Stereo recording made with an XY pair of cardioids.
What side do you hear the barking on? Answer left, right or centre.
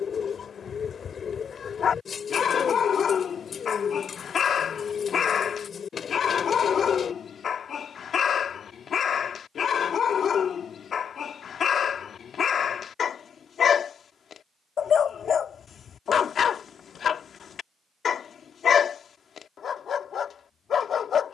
left.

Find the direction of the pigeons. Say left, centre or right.
left.